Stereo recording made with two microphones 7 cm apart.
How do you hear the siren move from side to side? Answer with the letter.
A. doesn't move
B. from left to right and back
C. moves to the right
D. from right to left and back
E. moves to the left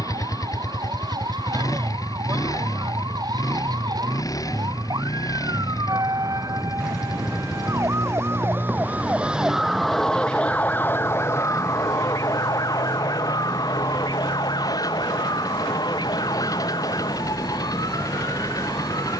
E.